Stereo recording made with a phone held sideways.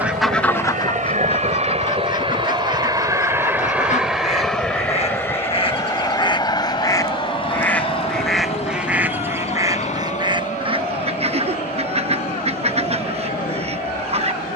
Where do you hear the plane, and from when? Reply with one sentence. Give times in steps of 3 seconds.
You can hear the plane on the right from 0 s, in the centre from 3 s and on the left from 6 s.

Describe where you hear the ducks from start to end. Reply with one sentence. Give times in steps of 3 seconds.
You can hear the ducks on the left from 0 s, in the centre from 6 s and on the right from 9 s.